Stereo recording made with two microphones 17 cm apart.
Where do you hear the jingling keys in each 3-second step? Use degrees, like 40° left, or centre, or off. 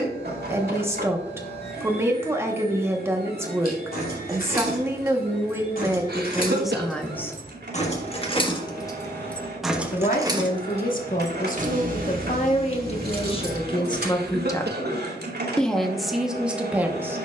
off, 60° left, 40° left, 30° right, 70° right, off.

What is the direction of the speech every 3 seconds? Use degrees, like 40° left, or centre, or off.
20° right, 20° right, centre, 60° left, 30° left, centre.